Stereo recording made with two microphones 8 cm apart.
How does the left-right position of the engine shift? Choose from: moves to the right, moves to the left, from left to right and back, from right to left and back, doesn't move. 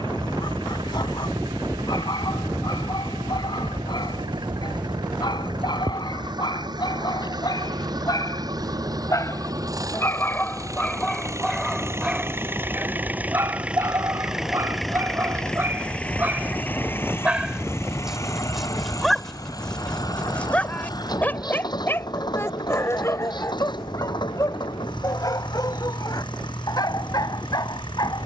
moves to the left.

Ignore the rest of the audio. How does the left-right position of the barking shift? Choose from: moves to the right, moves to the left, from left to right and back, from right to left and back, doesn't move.
from left to right and back.